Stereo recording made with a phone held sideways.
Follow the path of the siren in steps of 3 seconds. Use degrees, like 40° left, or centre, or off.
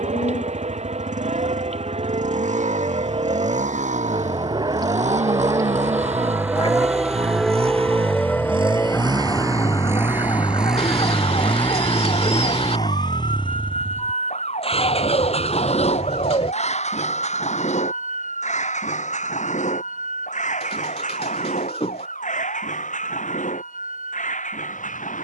60° right, 40° right, centre, 30° left, 50° left, 60° left, 70° left, 70° left, 80° left.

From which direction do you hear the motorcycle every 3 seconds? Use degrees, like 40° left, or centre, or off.
80° right, 70° right, 50° right, 10° right, 30° left, 50° left, 60° left, 70° left, 70° left.